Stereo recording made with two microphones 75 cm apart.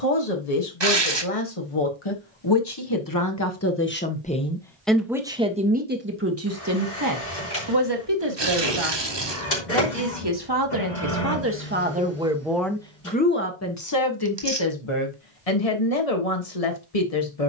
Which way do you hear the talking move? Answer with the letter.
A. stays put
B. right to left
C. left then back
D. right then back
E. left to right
D.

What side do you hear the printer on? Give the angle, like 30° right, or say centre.
70° left.